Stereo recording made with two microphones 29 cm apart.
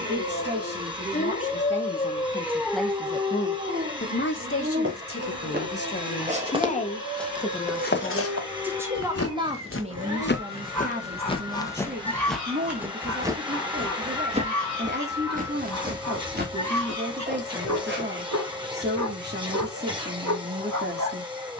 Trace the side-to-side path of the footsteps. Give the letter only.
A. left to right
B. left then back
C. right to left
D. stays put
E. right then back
B.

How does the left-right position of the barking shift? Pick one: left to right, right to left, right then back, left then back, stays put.
left to right.